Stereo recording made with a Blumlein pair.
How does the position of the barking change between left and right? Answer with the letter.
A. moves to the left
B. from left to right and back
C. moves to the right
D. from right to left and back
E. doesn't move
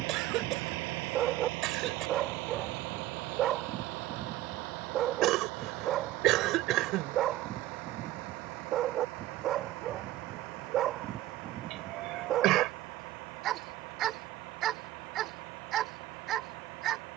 E.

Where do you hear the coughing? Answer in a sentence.
In this clip you hear the coughing on the right.